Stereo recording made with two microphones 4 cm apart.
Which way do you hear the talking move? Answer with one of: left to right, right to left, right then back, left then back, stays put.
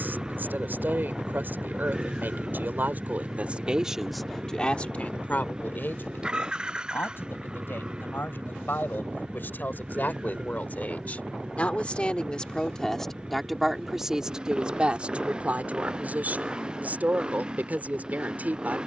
left then back.